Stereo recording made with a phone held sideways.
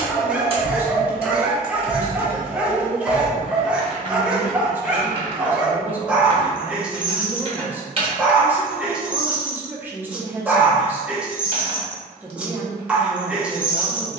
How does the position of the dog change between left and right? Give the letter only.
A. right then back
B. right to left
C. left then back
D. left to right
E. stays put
E.